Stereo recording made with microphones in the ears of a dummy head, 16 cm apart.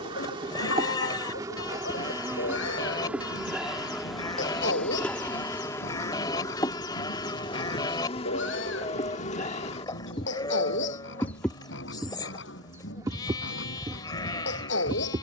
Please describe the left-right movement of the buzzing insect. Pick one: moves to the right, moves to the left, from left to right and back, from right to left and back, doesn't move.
from right to left and back.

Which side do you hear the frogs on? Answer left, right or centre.
left.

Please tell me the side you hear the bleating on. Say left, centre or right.
left.